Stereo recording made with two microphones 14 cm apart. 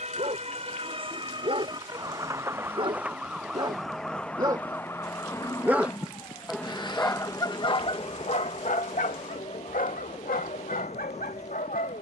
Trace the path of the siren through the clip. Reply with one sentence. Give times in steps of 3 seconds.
You can hear the siren on the right from 0 s, in the centre from 3 s and on the left from 6 s.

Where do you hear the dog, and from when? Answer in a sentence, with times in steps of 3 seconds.
You can hear the dog on the right from 0 s and on the left from 6 s.